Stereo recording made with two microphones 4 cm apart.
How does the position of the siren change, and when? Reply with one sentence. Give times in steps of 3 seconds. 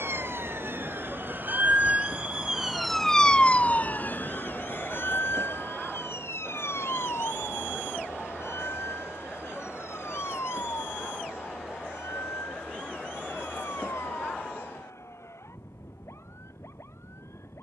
You can hear the siren on the right from 0 s and on the left from 3 s.